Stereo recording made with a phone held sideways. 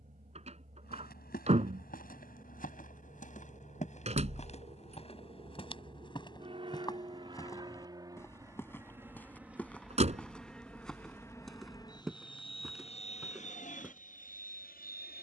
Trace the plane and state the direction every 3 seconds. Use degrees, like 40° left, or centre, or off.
50° right, 40° right, 30° right, 10° left, 40° left.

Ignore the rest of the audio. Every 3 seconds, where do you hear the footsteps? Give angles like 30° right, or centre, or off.
60° left, 40° left, 20° left, 10° left, centre.